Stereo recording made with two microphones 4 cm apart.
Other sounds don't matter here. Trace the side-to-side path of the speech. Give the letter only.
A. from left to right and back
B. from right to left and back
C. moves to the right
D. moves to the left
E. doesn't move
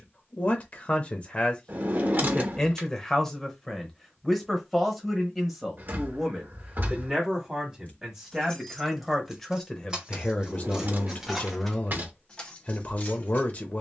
A.